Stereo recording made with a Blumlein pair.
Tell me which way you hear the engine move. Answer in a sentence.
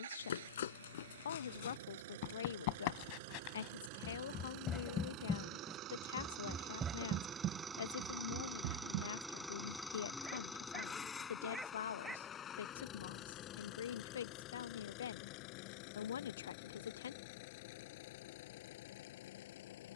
You can hear the engine move from right to left.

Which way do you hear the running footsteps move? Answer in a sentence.
You can hear the running footsteps go from the left side to the right.